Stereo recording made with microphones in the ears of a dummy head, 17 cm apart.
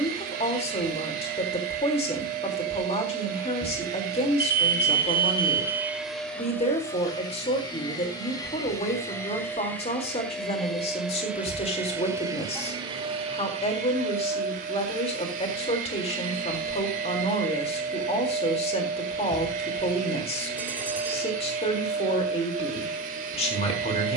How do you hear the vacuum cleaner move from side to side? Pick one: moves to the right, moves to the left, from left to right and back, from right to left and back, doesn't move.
from right to left and back.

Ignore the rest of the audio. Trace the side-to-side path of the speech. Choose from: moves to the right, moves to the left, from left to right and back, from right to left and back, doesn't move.
doesn't move.